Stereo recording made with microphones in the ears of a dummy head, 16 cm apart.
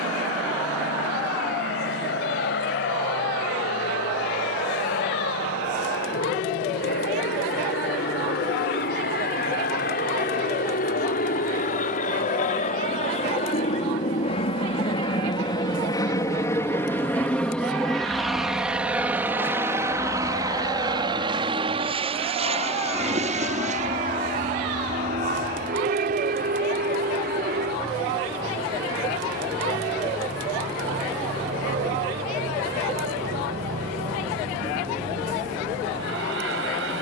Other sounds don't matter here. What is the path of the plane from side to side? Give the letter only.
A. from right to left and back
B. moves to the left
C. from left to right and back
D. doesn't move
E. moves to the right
E.